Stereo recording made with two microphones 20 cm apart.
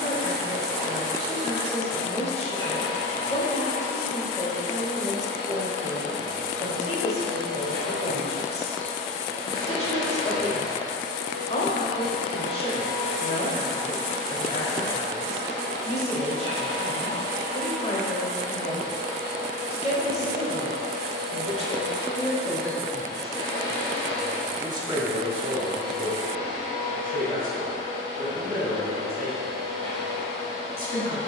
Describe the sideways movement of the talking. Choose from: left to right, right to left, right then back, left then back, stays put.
left to right.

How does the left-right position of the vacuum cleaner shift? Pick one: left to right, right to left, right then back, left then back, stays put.
stays put.